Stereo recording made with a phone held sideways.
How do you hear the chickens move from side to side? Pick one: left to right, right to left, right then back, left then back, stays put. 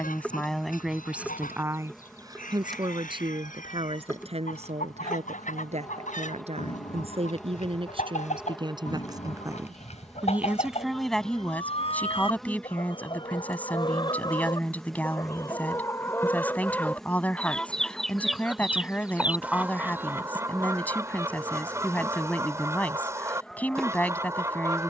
left to right.